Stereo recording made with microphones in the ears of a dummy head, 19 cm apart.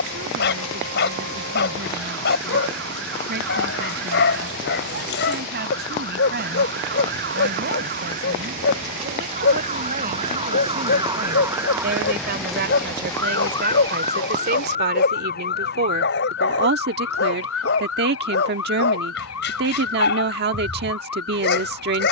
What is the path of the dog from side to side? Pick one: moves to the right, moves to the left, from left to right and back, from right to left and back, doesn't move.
doesn't move.